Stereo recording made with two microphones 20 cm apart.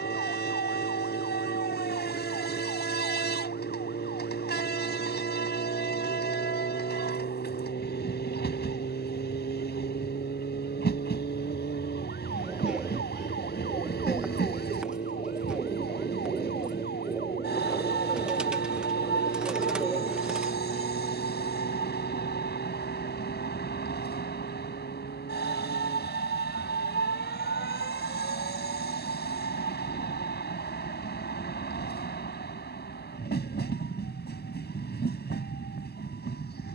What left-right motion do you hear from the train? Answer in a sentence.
In this clip you hear the train stay put.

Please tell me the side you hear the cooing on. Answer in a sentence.
In this clip you hear the cooing in the centre.